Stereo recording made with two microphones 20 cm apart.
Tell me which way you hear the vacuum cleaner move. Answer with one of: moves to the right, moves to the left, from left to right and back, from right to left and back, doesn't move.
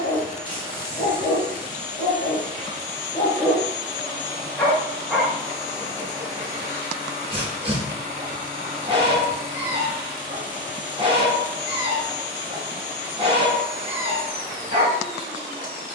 doesn't move.